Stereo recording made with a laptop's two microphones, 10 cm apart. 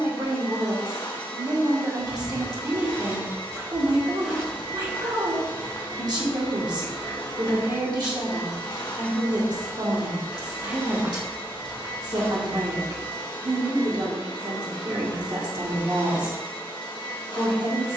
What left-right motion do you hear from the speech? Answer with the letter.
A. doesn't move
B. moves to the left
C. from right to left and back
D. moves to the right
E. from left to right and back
A.